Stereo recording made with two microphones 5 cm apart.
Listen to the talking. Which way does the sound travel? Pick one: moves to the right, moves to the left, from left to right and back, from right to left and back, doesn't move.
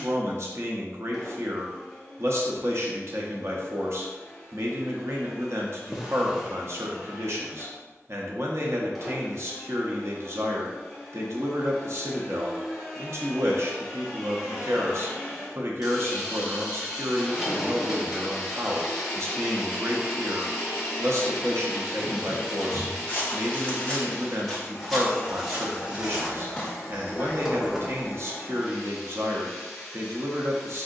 doesn't move.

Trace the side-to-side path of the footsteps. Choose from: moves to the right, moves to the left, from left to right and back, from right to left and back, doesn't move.
from left to right and back.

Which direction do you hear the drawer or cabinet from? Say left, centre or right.
centre.